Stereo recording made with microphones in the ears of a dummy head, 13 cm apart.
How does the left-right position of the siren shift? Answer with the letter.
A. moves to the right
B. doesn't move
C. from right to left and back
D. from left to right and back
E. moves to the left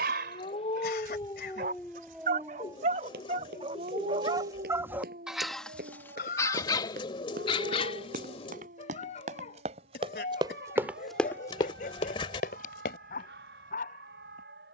A.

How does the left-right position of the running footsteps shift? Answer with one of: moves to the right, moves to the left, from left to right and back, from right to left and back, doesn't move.
moves to the left.